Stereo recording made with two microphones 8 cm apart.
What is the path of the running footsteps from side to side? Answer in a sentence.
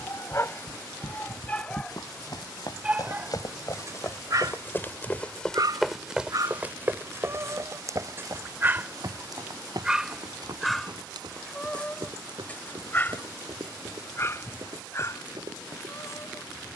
You can hear the running footsteps move from left to right.